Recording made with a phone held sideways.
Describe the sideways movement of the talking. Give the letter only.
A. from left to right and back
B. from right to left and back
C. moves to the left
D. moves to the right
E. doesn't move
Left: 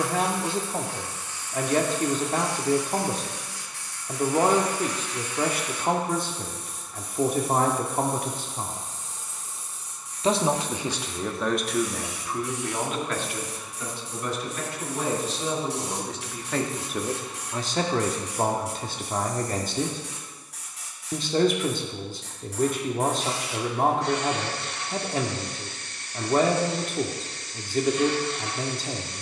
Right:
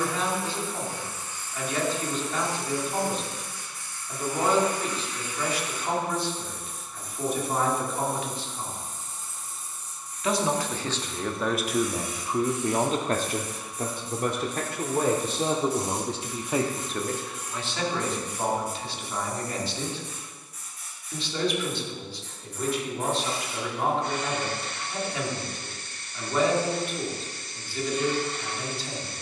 A.